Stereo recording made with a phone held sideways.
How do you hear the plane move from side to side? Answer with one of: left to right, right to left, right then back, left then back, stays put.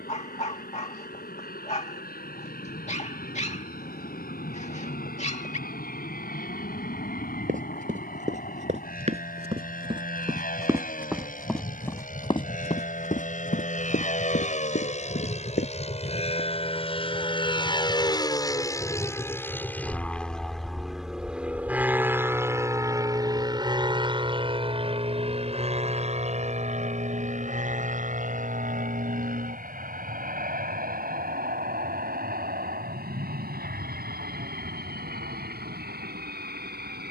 left to right.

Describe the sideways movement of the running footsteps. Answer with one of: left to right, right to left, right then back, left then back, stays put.
right to left.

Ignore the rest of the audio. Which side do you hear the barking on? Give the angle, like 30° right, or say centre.
40° left.